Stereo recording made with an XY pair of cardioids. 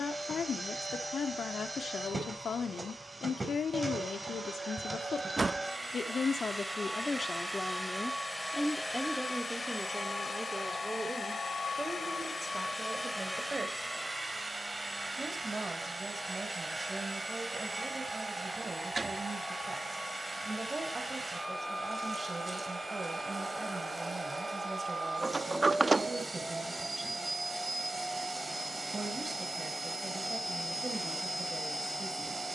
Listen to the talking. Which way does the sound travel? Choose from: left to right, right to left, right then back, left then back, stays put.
left to right.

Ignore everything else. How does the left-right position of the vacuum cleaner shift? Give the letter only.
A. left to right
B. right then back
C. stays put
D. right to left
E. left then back
E.